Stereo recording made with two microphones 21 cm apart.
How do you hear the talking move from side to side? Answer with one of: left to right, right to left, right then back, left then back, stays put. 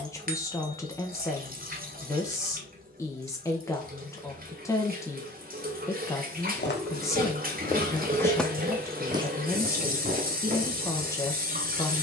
stays put.